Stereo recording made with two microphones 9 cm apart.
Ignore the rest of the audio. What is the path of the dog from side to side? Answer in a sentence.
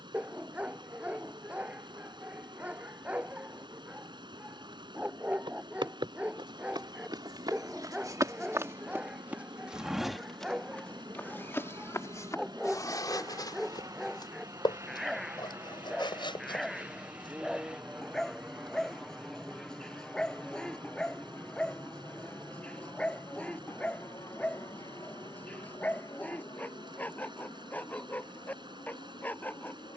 You can hear the dog move from right to left.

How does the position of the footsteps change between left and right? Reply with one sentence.
In this clip you hear the footsteps move from right to left.